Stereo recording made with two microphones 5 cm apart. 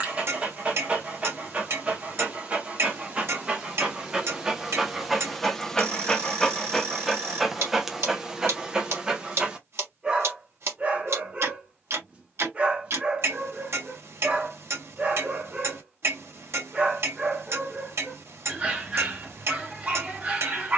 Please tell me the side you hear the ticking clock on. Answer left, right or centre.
right.